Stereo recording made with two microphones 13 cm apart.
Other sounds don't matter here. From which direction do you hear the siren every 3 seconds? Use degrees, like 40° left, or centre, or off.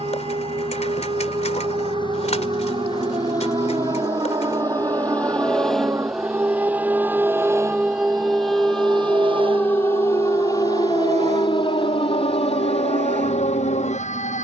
40° right, 30° right, 10° right, 30° left, 50° left.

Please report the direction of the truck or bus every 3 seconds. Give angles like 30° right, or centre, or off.
40° left, 20° left, 20° right, 50° right, 70° right.